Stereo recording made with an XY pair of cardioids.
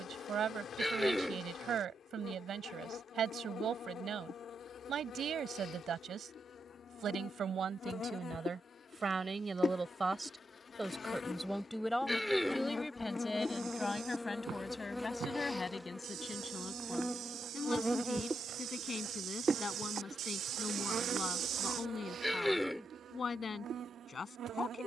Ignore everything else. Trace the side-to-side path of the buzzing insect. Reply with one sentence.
In this clip you hear the buzzing insect move from left to right.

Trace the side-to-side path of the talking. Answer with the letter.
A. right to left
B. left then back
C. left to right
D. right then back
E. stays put
A.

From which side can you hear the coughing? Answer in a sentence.
In this clip you hear the coughing in the centre.